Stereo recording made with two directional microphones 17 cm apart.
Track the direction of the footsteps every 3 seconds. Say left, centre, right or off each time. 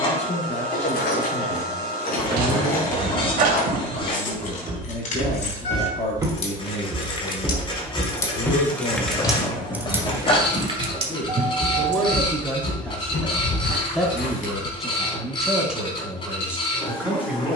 right, right, centre, left, left, off.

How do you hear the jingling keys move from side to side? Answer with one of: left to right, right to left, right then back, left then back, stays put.
left to right.